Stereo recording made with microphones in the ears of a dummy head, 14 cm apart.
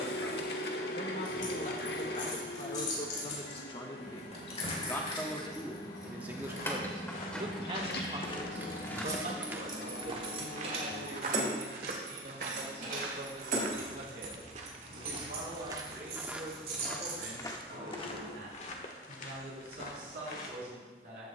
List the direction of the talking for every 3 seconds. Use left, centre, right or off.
left, left, right, right, right, right, right.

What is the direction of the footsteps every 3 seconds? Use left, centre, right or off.
off, off, left, right, right, centre, left.